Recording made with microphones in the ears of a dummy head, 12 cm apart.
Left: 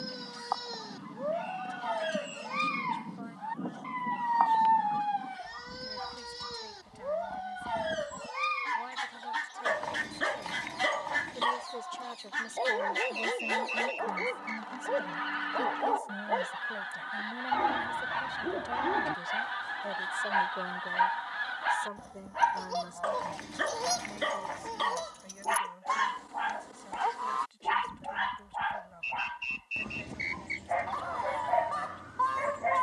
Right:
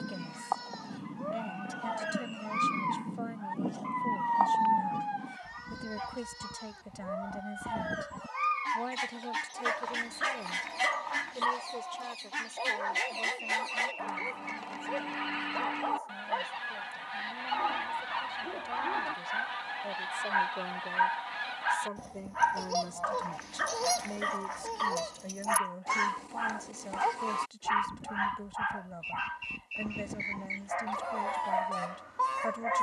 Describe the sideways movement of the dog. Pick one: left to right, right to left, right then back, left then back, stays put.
stays put.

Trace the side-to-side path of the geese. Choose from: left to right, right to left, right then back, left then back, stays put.
stays put.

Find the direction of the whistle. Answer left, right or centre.
left.